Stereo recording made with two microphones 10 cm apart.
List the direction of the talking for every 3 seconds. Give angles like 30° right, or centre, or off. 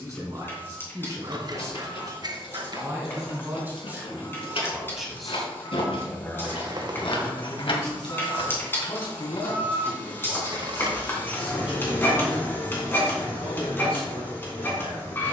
40° right, 10° right, 40° left, 70° left, 70° left.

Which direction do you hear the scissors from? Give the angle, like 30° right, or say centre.
40° right.